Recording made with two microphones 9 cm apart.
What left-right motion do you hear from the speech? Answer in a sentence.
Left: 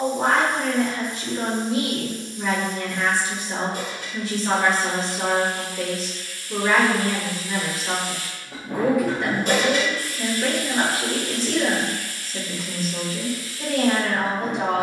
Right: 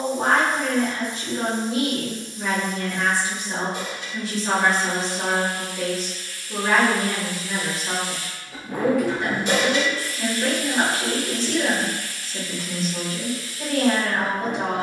In this clip you hear the speech stay put.